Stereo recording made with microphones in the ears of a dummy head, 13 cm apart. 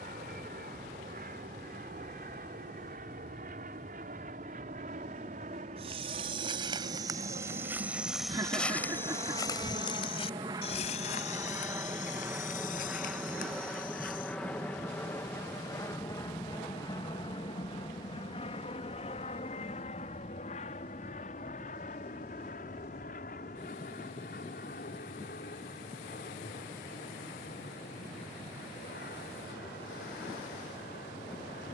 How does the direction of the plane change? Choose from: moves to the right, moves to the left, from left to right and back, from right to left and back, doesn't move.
moves to the left.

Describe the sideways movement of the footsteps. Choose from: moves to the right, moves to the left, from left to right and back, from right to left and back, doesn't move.
moves to the left.